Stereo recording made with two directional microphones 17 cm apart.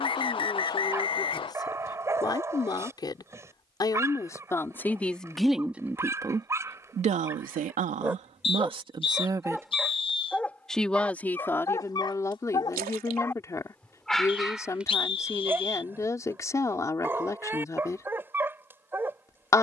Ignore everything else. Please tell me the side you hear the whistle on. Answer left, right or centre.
left.